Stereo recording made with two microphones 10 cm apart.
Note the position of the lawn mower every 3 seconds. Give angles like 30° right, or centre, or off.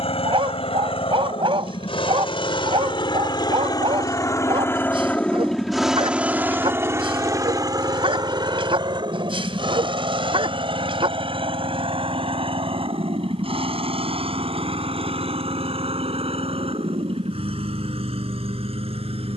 70° left, 30° left, 40° right, 60° right, 70° right, 70° right, 80° right.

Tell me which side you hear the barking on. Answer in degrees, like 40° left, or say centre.
60° right.